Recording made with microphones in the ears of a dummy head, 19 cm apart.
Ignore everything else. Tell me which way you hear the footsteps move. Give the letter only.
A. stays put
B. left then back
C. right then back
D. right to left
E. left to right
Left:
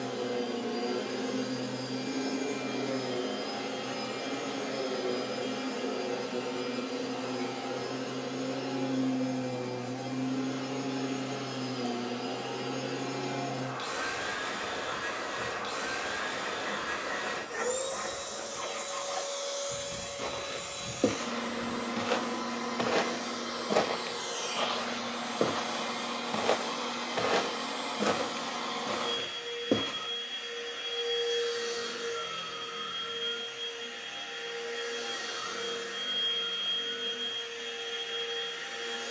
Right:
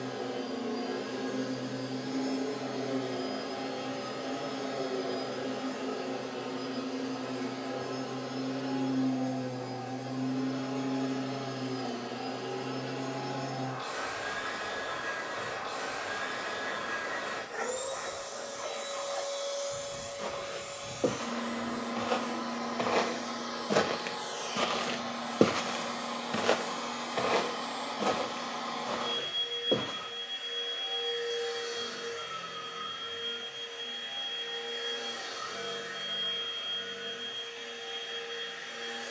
C.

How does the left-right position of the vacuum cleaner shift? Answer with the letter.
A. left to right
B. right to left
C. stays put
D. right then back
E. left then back
C.